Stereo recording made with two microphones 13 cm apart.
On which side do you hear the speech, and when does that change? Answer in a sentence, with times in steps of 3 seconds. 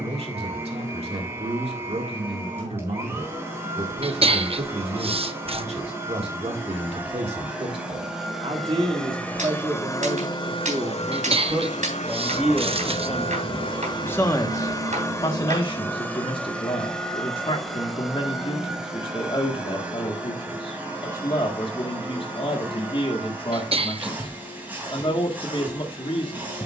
In this clip you hear the speech on the right from 0 s, in the centre from 12 s and on the left from 15 s.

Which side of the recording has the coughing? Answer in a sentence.
You can hear the coughing on the right.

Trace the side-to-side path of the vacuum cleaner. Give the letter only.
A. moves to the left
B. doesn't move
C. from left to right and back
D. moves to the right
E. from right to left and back
E.